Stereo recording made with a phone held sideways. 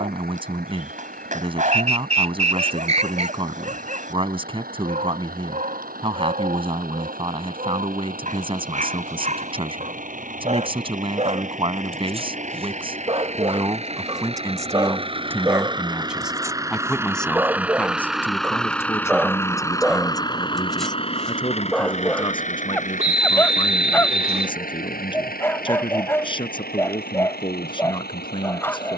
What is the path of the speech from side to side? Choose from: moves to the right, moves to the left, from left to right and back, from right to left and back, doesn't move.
moves to the left.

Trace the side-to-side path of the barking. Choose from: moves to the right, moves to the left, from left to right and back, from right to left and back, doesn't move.
moves to the left.